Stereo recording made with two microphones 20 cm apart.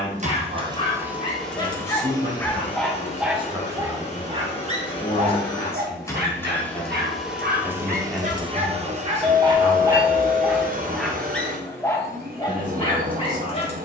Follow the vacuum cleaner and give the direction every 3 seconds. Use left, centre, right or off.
centre, left, centre, right, right.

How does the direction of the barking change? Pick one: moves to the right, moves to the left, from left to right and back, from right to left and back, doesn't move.
from left to right and back.